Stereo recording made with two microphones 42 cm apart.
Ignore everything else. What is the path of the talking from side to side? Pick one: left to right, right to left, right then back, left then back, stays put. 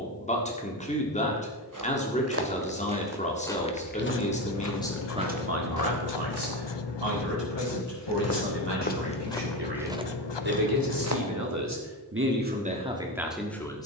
right then back.